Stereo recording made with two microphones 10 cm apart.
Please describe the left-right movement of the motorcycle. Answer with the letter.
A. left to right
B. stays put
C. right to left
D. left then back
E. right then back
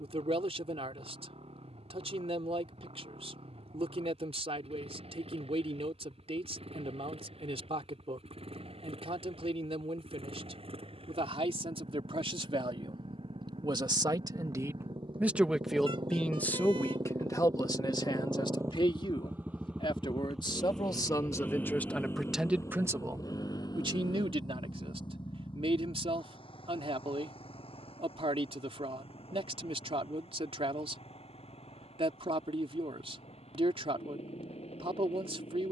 C.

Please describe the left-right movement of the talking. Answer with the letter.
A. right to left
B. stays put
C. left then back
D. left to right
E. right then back
C.